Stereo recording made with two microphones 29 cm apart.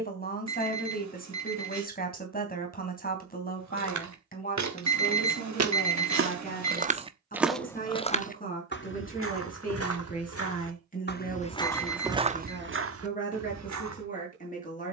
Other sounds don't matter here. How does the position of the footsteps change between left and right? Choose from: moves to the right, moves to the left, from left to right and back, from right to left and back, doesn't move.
from right to left and back.